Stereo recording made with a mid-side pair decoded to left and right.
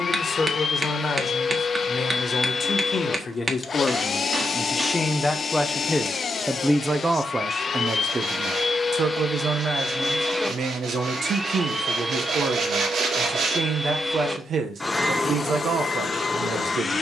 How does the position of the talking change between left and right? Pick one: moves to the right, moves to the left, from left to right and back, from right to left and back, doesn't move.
moves to the right.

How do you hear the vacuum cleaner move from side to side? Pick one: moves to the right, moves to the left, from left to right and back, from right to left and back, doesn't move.
from left to right and back.